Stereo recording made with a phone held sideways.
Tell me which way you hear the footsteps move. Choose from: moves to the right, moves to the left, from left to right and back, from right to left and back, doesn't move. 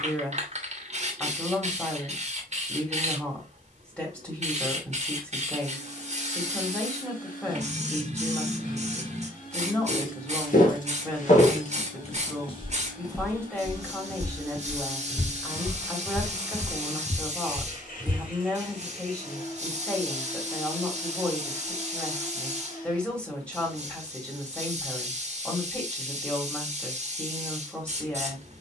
from left to right and back.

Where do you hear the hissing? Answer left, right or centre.
right.